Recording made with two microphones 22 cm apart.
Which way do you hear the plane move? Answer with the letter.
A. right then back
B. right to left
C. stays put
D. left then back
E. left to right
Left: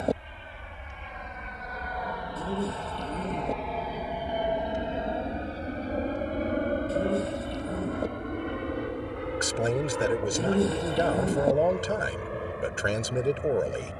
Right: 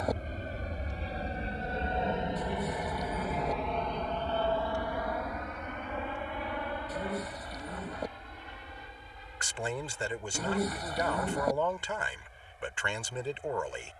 B.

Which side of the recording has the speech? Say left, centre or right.
left.